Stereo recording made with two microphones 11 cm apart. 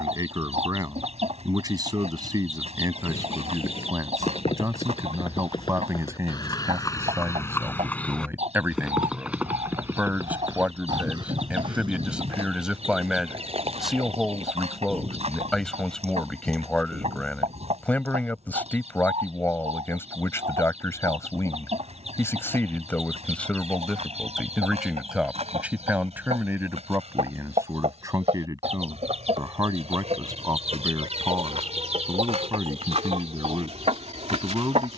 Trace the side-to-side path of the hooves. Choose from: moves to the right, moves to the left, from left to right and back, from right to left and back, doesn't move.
moves to the right.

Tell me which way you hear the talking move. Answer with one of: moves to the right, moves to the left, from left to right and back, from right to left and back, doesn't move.
from right to left and back.